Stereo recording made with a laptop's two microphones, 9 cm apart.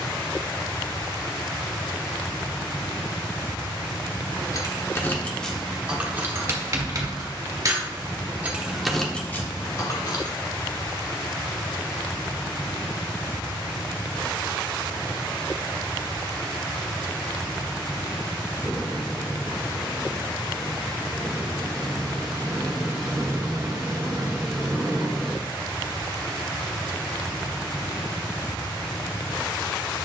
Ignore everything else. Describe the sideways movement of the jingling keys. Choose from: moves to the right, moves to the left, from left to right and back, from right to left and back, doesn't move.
from left to right and back.